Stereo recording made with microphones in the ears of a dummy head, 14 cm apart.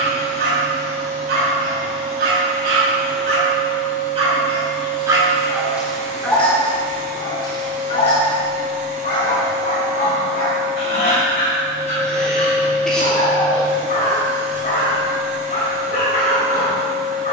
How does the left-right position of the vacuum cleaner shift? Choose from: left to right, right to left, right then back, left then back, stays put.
stays put.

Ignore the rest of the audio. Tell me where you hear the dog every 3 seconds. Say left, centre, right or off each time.
right, right, left, left, left, left.